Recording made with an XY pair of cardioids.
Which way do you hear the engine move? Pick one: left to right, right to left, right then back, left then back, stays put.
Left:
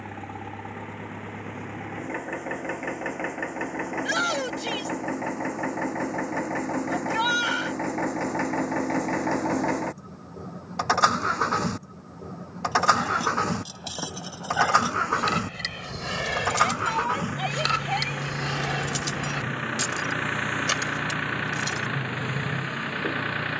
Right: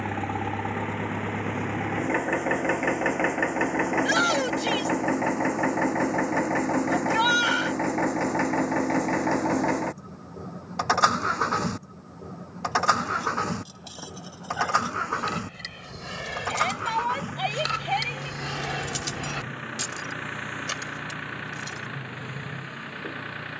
right to left.